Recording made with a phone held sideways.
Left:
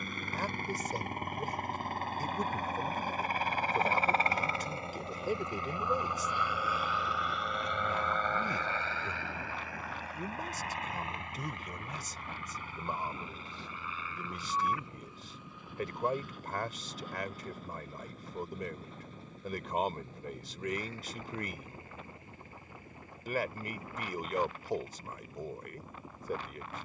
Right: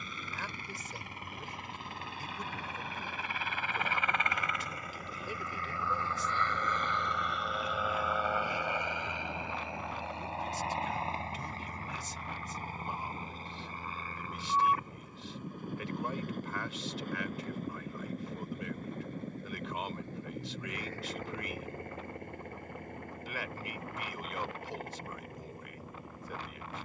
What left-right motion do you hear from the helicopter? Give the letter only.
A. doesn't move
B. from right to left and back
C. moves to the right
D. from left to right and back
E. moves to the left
C.